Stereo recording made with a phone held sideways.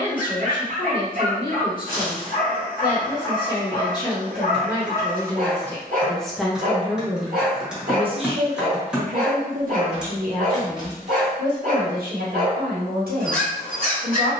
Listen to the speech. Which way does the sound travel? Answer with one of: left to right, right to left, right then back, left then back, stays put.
left to right.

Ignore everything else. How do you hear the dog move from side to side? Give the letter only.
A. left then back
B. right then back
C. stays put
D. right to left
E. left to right
C.